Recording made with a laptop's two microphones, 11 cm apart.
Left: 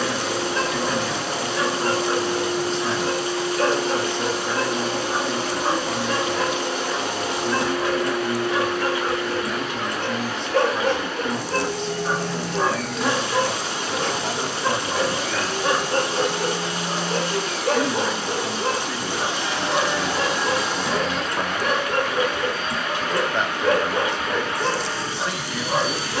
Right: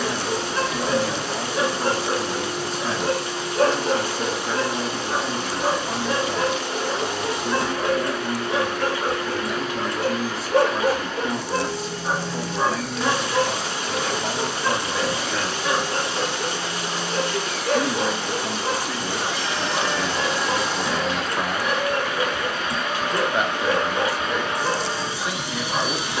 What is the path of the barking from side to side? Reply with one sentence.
In this clip you hear the barking move to the left.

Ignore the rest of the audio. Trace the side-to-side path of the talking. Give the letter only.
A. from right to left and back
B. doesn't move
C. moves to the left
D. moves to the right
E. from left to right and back
B.